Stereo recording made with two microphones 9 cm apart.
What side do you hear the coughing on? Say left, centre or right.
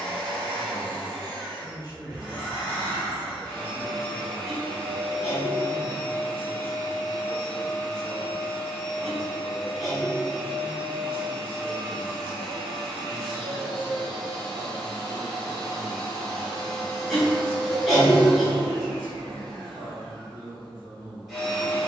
centre.